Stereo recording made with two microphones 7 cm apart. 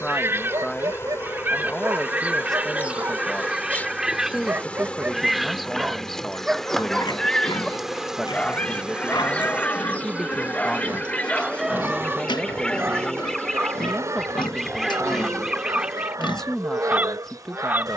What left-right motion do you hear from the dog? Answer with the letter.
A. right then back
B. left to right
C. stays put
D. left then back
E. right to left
D.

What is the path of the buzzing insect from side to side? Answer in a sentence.
You can hear the buzzing insect move from left to right.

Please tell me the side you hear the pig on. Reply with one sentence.
You can hear the pig on the left.